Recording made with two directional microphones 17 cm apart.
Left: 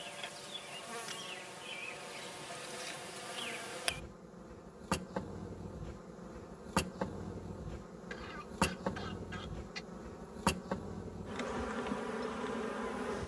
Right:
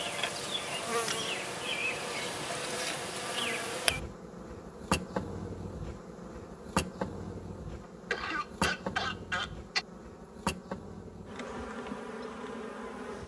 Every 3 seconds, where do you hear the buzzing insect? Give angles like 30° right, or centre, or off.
50° right, 30° right, 10° right, centre, 10° left.